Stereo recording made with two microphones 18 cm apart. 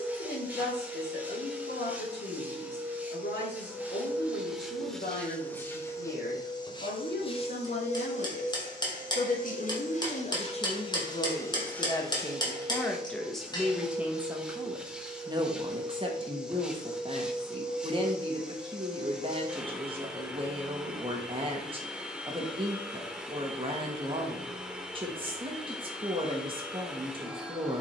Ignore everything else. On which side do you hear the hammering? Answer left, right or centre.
left.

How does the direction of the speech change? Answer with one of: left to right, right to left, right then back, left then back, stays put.
left to right.